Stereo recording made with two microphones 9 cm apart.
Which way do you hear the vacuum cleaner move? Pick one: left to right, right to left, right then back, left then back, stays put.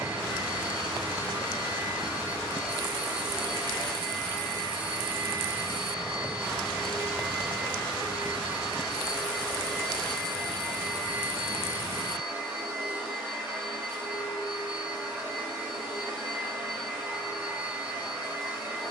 stays put.